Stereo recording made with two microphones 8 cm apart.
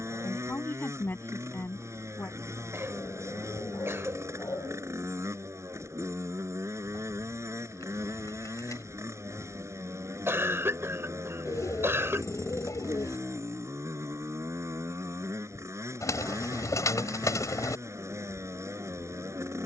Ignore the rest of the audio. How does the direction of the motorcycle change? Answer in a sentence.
You can hear the motorcycle stay put.